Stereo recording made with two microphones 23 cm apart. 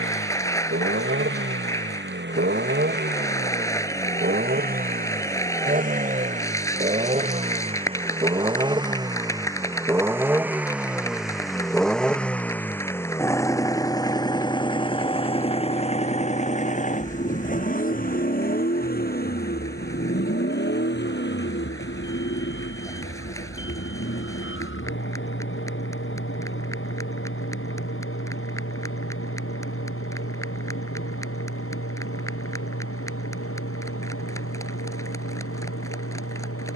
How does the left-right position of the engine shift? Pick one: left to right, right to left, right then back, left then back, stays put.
right to left.